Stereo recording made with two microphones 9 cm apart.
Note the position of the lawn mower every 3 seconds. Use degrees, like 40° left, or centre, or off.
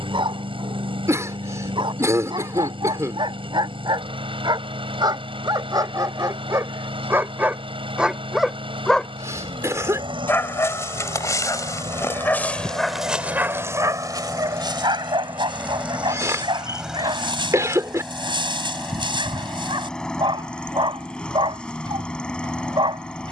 80° right, 80° right, 80° right, 70° right, 40° right, 10° right, 10° left, 10° left.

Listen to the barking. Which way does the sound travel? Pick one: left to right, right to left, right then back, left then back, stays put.
left then back.